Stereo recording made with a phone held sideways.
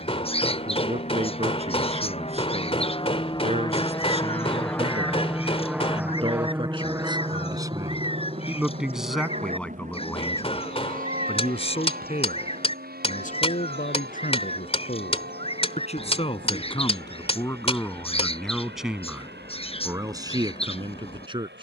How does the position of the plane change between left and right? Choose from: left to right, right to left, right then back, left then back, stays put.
left to right.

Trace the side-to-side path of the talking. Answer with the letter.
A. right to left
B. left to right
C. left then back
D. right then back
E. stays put
C.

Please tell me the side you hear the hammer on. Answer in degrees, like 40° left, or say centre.
40° left.